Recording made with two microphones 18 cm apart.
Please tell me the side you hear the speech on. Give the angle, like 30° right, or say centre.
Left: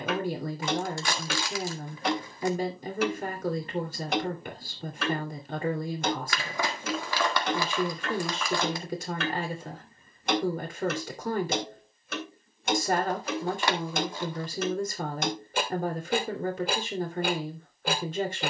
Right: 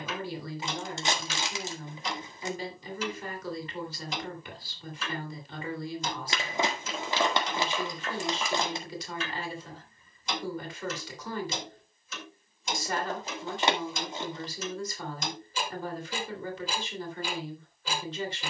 50° left.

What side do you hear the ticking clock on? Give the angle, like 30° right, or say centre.
60° left.